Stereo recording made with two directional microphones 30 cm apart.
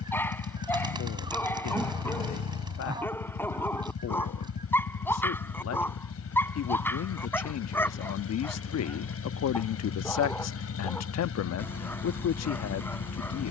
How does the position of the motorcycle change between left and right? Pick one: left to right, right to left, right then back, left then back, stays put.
stays put.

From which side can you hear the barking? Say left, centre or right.
centre.